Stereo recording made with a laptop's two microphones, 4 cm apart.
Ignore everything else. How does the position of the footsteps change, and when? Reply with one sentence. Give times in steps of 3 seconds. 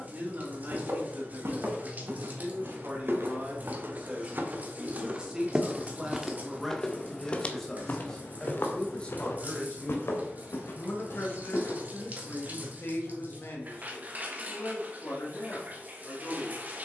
In this clip you hear the footsteps on the right from 0 s, on the left from 6 s and not at all from 12 s.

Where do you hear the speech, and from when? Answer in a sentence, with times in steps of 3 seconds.
You can hear the speech on the right from 0 s, in the centre from 6 s and on the left from 9 s.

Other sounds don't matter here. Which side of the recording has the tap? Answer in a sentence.
In this clip you hear the tap on the right.